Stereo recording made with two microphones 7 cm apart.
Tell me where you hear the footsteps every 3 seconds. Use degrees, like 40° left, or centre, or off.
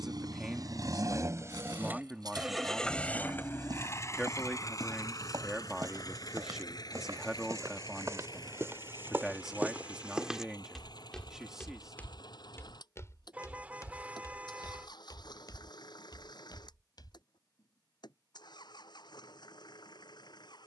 70° right, 60° right, 50° right, centre, 40° left, 70° left, off.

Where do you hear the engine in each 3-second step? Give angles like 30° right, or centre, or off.
40° right, 40° left, 60° left, 70° left, 70° left, 70° left, 70° left.